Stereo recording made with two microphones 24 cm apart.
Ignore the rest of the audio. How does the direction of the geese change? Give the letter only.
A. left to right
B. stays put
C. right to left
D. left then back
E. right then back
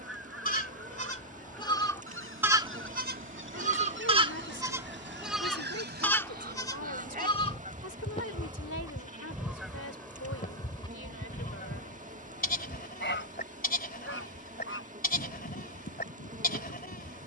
C.